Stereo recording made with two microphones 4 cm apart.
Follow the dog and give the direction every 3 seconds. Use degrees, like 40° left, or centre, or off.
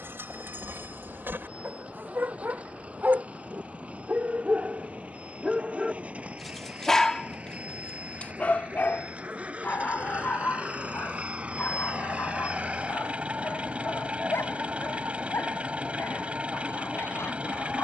60° right, 30° right, 20° left, 50° left, 70° left, 70° left.